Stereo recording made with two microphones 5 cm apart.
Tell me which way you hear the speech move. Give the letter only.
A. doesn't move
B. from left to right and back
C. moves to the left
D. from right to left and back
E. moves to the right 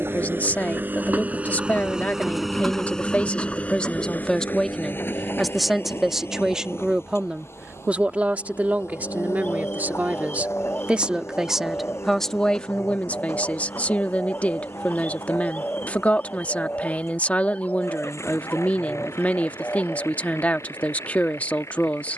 B.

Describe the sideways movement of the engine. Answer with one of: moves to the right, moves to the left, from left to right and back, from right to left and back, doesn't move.
moves to the left.